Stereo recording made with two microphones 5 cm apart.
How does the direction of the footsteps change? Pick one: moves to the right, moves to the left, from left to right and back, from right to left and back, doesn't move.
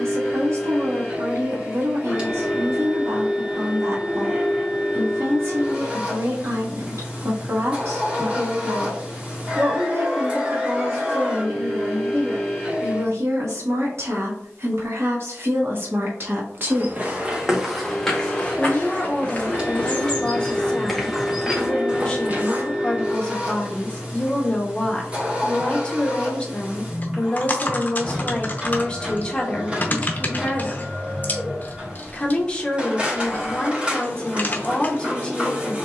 from right to left and back.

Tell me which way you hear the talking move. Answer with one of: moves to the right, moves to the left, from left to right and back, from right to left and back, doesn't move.
moves to the left.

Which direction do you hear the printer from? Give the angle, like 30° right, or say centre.
20° right.